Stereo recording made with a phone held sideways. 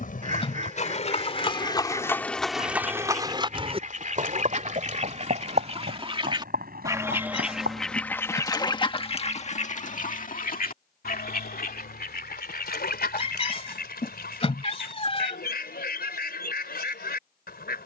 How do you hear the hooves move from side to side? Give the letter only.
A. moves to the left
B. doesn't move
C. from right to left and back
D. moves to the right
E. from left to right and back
D.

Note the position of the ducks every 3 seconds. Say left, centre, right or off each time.
right, right, centre, left, left, left.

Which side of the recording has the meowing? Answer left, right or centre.
left.